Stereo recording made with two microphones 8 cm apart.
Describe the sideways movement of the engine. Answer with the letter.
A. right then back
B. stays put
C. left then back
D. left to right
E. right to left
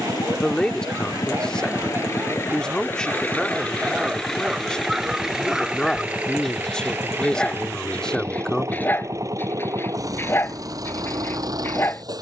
D.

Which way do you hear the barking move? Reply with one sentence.
You can hear the barking move to the left.